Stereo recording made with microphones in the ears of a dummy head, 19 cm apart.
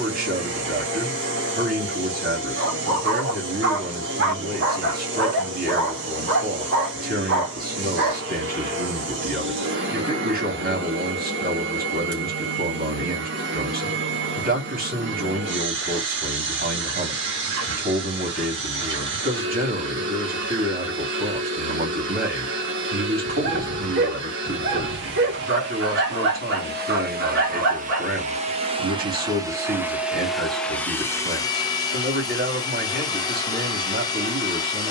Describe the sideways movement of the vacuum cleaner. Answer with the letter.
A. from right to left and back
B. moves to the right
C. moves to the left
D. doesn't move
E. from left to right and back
C.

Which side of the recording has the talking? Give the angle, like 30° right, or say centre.
40° right.